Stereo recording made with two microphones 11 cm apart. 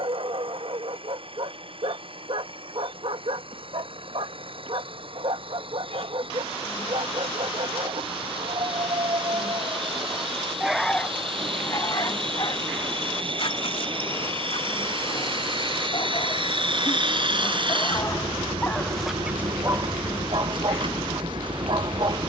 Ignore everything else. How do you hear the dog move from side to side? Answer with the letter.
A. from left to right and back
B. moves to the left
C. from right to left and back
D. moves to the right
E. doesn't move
C.